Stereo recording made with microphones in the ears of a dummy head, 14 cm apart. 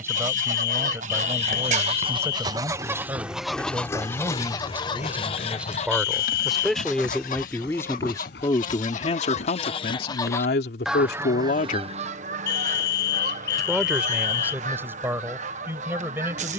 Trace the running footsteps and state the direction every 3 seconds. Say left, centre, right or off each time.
right, left, left, left, off, off.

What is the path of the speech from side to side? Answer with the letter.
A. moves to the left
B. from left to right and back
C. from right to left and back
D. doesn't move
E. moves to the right
C.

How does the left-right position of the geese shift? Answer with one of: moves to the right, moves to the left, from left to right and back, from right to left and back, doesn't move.
from right to left and back.